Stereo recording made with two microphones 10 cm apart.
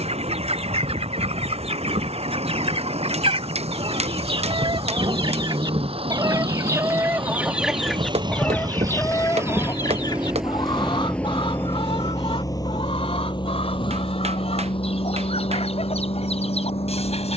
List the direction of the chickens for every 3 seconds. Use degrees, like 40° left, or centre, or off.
70° right, 60° right, 10° right, 50° left, 70° left, 70° left.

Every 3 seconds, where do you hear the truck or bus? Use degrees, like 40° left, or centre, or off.
80° right, 70° right, 50° right, centre, 40° left, 60° left.